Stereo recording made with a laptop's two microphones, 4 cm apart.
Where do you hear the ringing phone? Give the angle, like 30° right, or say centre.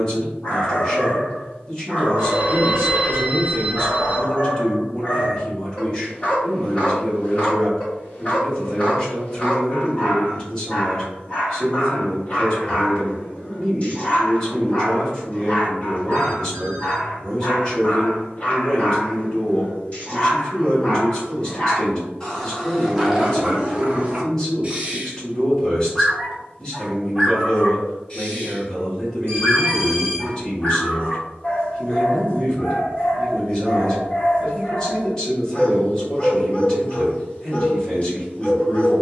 60° right.